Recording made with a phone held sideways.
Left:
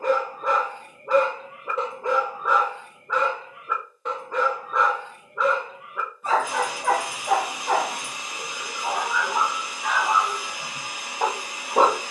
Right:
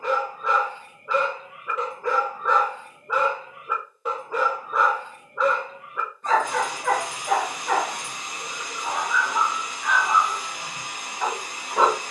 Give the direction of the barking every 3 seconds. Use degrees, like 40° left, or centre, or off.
30° left, centre, 20° left, 40° left.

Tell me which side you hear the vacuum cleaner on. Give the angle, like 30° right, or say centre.
10° left.